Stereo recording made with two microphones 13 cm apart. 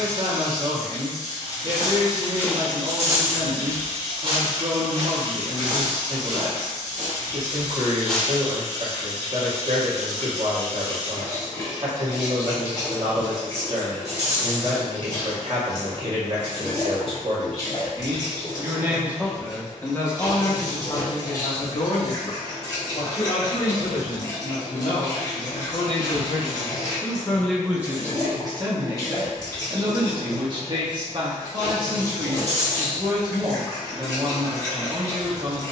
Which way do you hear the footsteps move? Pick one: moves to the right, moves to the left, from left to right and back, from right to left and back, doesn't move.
from left to right and back.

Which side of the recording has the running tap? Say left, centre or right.
left.